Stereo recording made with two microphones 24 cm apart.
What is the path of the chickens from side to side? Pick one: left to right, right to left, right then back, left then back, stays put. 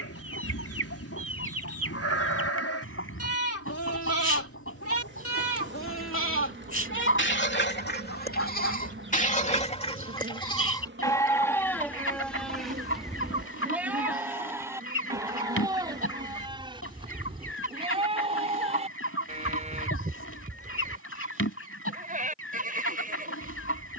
stays put.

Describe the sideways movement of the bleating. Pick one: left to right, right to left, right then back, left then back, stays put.
left to right.